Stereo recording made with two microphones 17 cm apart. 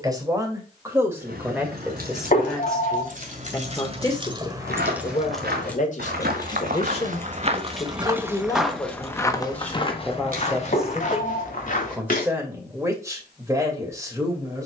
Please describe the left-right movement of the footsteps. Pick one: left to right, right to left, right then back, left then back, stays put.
right to left.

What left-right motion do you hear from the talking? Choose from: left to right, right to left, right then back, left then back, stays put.
left then back.